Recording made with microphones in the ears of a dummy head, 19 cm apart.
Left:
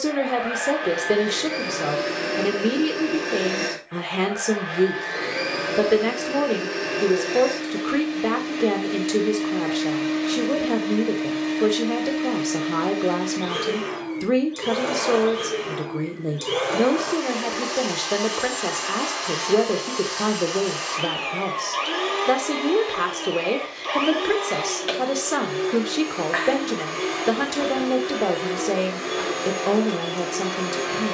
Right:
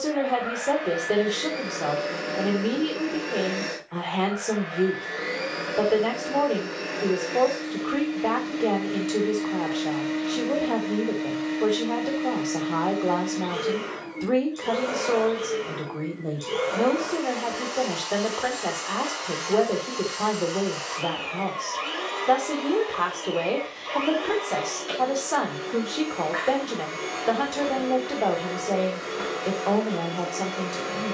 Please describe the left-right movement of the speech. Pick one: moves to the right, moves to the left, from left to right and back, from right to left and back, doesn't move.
doesn't move.